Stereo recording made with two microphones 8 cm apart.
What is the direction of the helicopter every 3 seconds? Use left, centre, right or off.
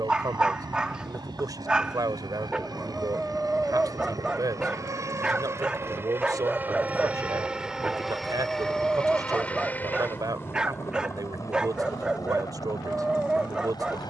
right, right, centre, left, left.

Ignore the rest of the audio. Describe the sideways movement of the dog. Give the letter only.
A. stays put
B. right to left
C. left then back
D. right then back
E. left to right
A.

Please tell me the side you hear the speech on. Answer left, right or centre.
right.